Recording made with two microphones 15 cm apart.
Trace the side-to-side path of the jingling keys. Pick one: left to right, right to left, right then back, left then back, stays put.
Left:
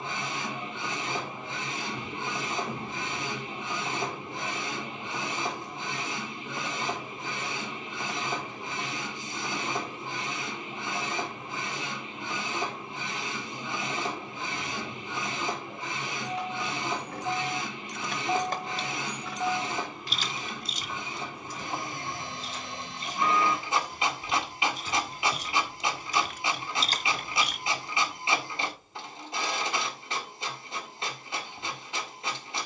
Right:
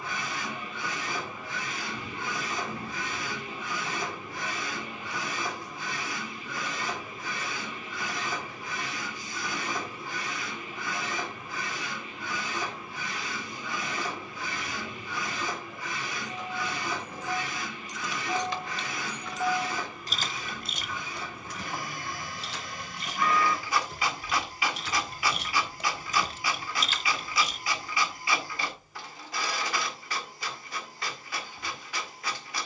right then back.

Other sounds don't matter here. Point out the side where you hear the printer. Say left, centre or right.
left.